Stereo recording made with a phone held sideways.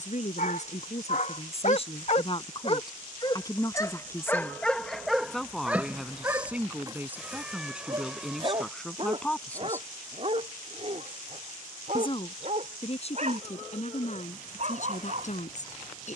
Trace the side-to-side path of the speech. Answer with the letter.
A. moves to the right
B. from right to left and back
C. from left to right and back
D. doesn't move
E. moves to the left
C.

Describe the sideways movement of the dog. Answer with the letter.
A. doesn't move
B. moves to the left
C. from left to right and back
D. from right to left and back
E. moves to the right
E.